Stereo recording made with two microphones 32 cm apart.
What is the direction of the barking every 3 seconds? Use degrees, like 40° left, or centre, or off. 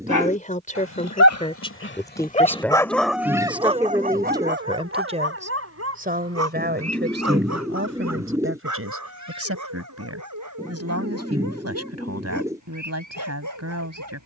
40° left, 30° right, 60° right, 60° right, 70° right.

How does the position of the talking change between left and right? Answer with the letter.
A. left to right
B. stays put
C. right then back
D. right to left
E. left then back
A.